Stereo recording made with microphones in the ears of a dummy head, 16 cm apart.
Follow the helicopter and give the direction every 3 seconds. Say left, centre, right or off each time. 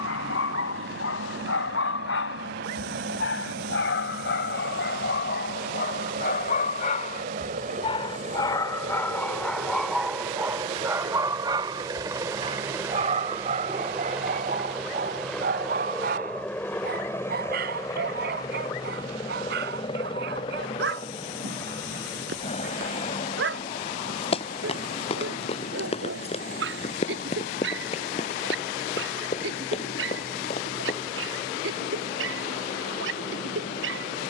right, right, right, right, centre, centre, left, left, left, left, left, left.